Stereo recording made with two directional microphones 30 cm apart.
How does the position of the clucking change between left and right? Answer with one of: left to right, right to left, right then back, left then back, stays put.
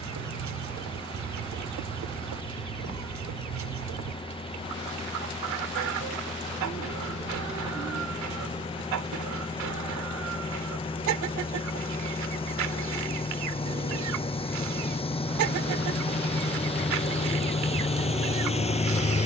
stays put.